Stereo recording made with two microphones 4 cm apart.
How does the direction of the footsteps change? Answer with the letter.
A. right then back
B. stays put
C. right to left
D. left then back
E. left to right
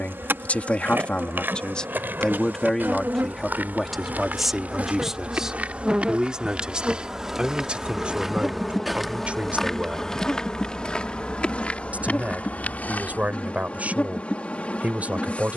C.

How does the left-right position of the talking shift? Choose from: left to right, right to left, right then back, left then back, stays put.
left to right.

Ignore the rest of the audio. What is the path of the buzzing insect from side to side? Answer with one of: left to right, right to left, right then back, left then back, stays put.
right to left.